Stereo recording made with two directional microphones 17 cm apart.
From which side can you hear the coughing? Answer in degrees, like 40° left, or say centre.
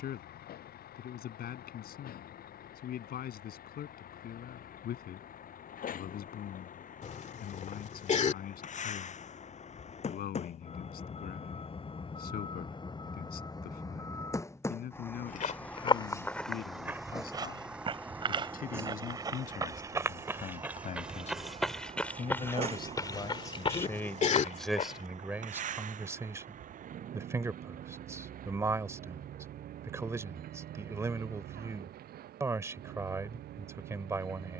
40° left.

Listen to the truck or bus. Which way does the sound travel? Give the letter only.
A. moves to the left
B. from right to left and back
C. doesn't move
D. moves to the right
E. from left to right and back
D.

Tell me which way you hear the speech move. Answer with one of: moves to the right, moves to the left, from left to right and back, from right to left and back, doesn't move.
moves to the right.